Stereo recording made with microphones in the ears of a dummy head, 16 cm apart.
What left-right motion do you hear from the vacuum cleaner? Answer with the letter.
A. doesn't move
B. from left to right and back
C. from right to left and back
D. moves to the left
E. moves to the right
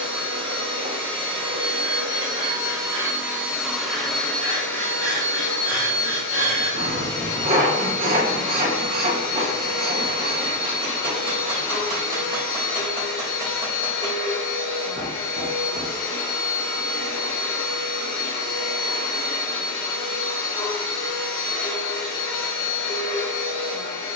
D.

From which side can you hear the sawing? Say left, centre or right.
right.